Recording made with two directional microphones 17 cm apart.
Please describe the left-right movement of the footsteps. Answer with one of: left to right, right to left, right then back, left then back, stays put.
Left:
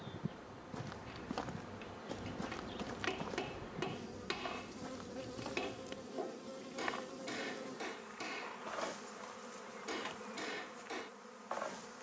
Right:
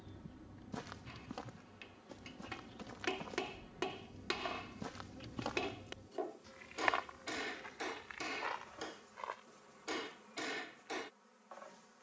left then back.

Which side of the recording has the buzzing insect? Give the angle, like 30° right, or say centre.
60° left.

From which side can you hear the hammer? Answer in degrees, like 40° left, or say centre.
10° right.